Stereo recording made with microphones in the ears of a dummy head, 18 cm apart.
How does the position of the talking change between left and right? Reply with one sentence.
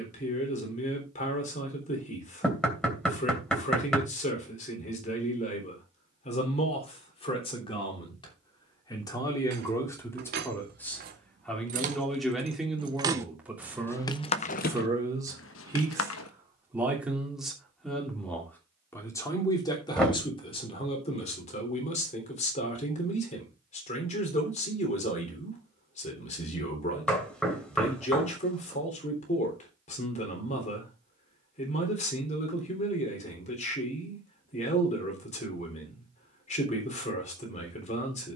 In this clip you hear the talking move from left to right and back again.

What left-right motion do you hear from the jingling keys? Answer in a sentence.
In this clip you hear the jingling keys move from right to left.